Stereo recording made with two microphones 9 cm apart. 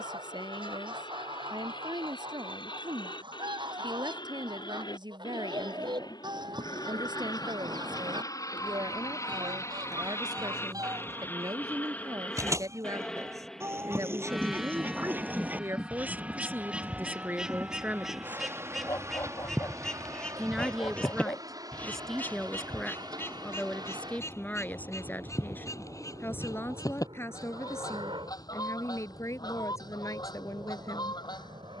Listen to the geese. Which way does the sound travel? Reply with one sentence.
In this clip you hear the geese move to the left.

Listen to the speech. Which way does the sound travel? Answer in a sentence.
In this clip you hear the speech move to the left.